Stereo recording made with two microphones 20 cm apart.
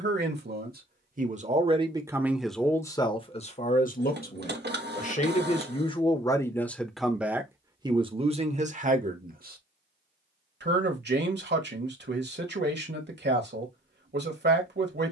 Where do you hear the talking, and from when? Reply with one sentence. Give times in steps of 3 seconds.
You can hear the talking on the right from 0 s, on the left from 3 s, in the centre from 6 s and on the right from 9 s.